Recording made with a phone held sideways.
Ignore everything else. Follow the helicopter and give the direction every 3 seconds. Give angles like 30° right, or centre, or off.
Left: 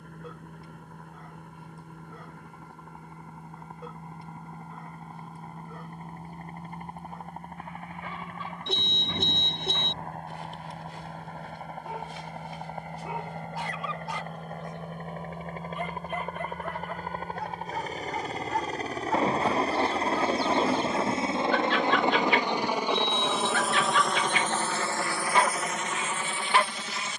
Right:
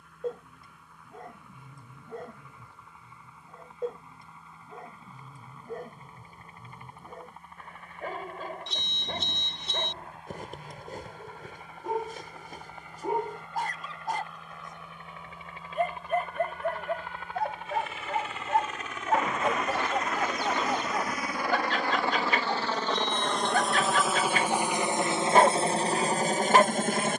60° left, 50° left, 50° left, 50° left, 50° left, 40° left, 40° left, 10° left, 30° right.